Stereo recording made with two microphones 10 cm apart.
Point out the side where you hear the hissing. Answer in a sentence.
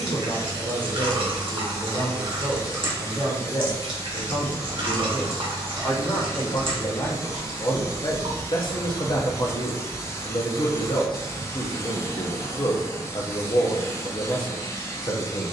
You can hear the hissing on the left.